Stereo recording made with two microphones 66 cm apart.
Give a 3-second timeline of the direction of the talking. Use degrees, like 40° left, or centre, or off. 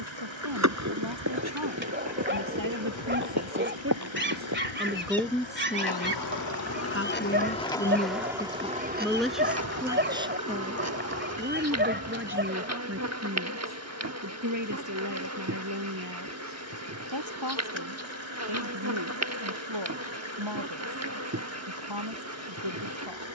30° right, 10° right, 10° left, 10° right, 20° right, 30° right, 40° right, 40° right.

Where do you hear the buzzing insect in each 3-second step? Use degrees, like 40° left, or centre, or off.
20° right, 50° left, 10° left, 20° right, 20° right, 20° right, 20° right, 20° right.